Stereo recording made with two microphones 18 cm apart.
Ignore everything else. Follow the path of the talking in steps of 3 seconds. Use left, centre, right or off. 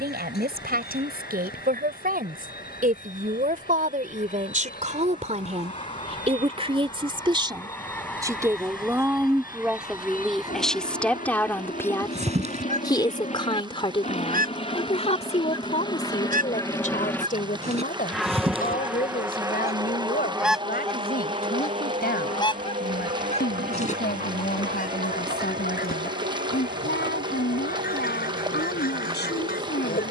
right, right, right, centre, left, left, left, left, left, left.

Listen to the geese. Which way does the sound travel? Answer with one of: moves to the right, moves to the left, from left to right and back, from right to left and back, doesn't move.
from left to right and back.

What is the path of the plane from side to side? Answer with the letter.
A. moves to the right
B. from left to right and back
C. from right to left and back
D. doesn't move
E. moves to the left
A.